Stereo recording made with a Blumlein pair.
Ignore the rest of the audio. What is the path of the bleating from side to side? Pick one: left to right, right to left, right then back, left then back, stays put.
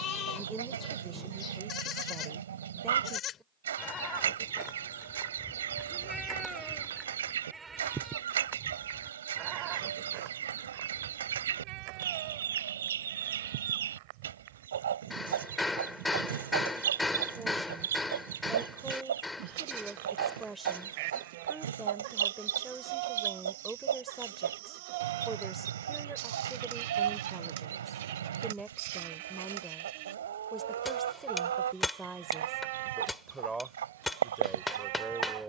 left to right.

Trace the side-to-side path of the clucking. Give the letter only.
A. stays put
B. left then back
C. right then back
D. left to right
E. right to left
A.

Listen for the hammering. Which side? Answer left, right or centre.
centre.